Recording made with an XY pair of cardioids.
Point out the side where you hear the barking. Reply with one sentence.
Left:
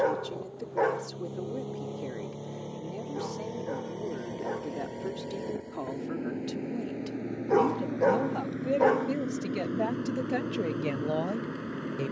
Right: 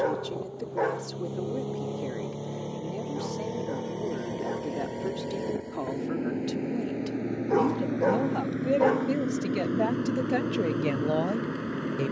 In this clip you hear the barking in the centre.